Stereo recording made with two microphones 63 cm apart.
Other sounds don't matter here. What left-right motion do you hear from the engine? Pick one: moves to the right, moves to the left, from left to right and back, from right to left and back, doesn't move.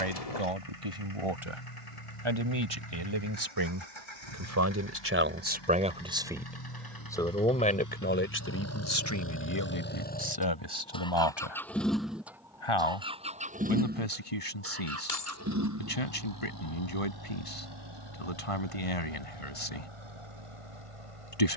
moves to the right.